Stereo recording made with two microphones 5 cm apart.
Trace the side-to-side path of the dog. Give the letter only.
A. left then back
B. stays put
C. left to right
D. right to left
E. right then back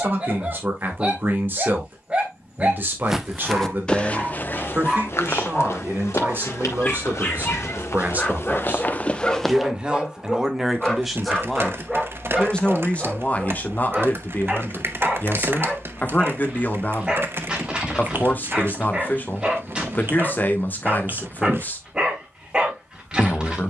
A.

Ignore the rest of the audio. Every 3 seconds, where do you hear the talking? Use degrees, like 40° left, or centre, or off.
40° right, 40° right, 40° right, 10° right, 30° left, 40° left, 40° left, 40° left.